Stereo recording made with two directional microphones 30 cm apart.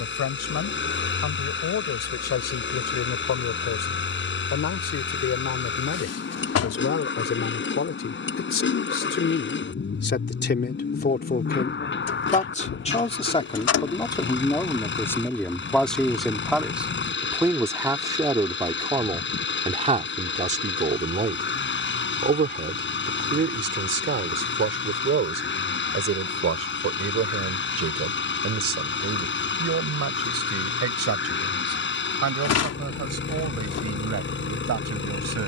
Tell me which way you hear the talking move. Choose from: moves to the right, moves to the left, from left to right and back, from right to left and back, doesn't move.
moves to the right.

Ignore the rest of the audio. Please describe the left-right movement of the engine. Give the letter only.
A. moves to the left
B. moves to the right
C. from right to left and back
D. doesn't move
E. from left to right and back
D.